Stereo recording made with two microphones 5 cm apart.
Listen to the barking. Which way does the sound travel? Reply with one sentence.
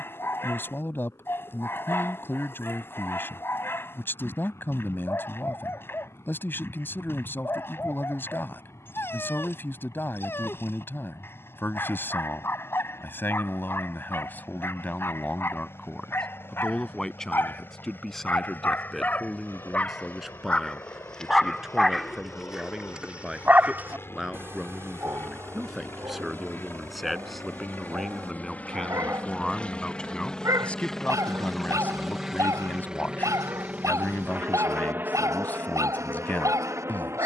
You can hear the barking travel towards the right.